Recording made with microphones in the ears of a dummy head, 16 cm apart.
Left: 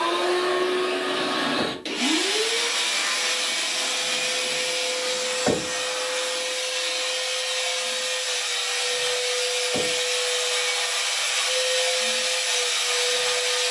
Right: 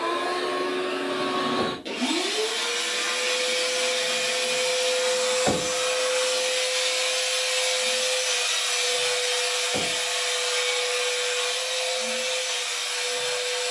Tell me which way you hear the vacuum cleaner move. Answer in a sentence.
You can hear the vacuum cleaner move from left to right and back again.